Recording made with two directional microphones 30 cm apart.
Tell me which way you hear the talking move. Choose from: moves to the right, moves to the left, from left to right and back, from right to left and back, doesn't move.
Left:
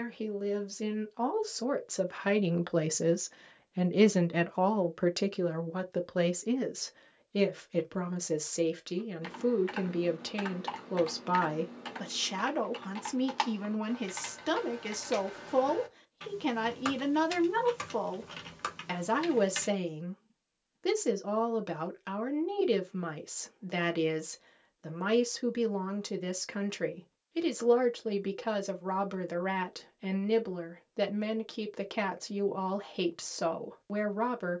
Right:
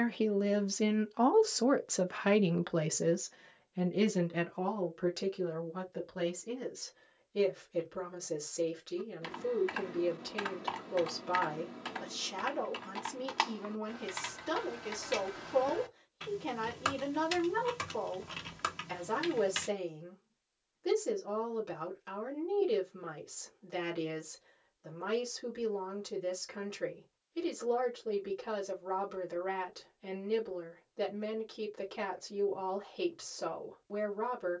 moves to the left.